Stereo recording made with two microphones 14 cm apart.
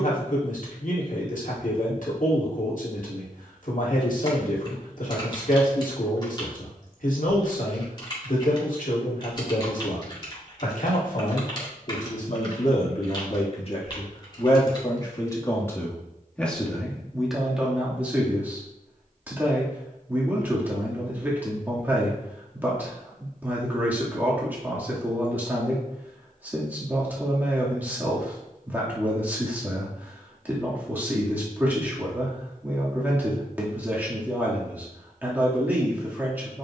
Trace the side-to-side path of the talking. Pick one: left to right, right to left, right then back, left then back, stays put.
left to right.